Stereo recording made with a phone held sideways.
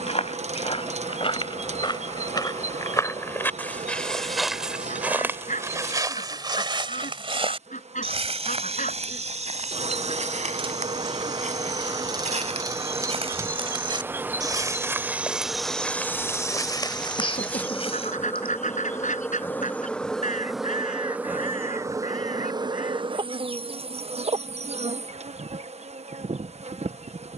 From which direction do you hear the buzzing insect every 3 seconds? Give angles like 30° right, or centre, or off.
60° right, 60° right, 60° right, 40° right, 20° right, centre, 10° left, 30° right, 60° right.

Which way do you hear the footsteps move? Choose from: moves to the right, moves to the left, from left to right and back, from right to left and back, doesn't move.
from left to right and back.